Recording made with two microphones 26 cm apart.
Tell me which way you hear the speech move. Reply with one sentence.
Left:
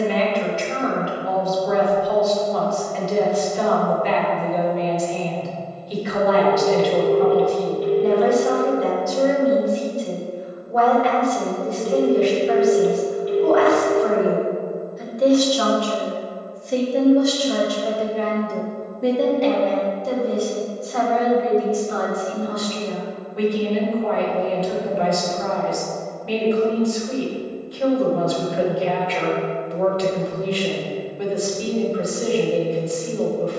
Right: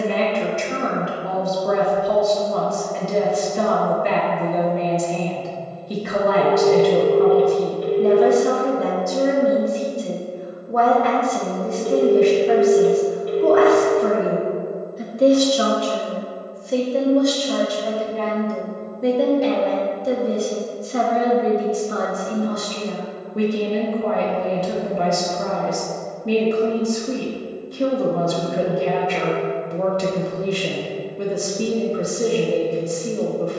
You can hear the speech go left and come back.